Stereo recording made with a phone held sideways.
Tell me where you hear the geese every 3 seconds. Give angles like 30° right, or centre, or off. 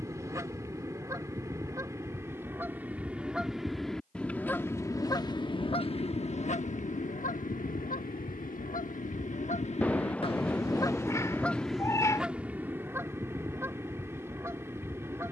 20° right, 20° left, 60° left, 30° left, 20° right.